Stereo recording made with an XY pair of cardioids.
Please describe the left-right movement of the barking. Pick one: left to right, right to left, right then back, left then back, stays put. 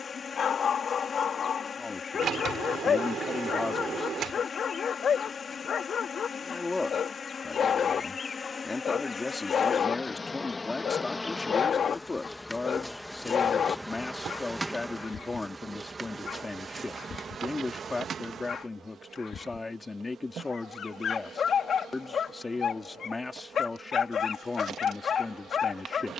stays put.